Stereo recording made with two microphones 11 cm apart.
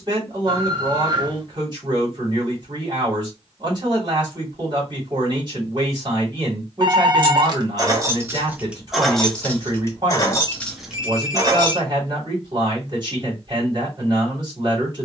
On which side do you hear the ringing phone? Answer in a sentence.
In this clip you hear the ringing phone on the right.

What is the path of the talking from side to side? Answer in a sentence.
You can hear the talking stay put.